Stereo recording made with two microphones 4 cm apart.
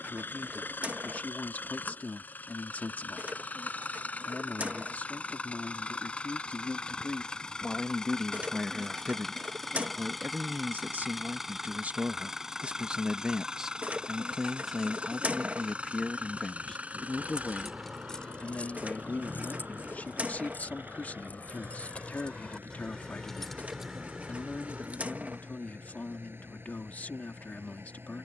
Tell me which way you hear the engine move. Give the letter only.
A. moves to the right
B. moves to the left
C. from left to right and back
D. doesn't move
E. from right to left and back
A.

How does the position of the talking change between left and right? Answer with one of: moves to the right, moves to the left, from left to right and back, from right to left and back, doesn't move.
from left to right and back.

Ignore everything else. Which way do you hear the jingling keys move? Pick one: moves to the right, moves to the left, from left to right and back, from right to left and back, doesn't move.
from right to left and back.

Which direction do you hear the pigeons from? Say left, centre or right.
right.